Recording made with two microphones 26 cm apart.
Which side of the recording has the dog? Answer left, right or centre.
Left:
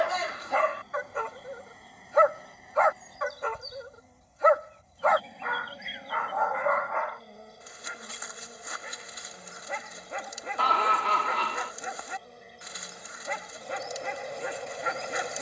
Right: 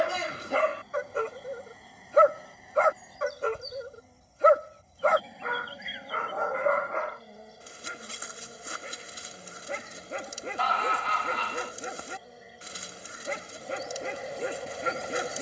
right.